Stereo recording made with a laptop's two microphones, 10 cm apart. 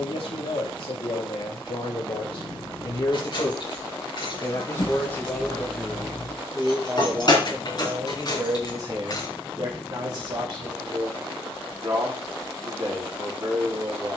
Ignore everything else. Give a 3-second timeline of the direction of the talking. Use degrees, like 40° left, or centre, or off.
70° left, 30° left, 30° right, 50° right, 50° right.